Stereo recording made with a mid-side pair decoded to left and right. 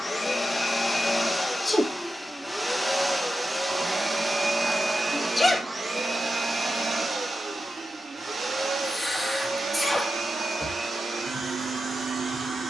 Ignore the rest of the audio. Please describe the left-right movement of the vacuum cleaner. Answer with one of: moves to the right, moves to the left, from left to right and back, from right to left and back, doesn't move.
moves to the right.